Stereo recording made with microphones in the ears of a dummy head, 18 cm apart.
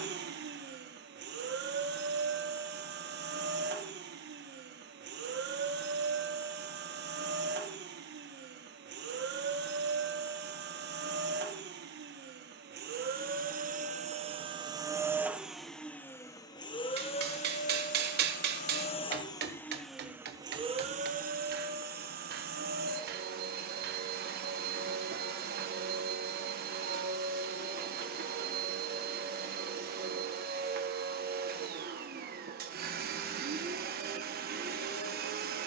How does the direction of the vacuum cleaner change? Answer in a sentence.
You can hear the vacuum cleaner move from right to left and back again.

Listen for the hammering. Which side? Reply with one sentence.
You can hear the hammering on the right.